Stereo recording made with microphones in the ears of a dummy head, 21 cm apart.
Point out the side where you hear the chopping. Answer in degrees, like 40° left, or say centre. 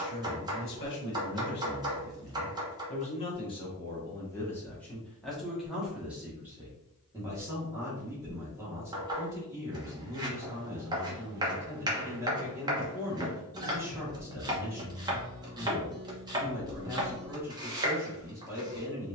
20° right.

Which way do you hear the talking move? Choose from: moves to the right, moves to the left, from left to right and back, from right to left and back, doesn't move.
moves to the right.